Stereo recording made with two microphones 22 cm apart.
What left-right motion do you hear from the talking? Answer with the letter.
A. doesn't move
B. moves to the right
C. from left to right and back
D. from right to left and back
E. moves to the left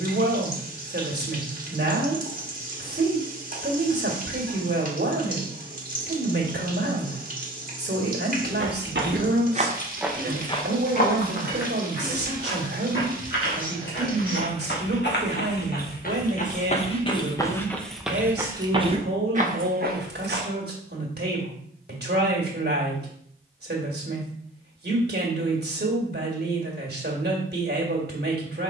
A.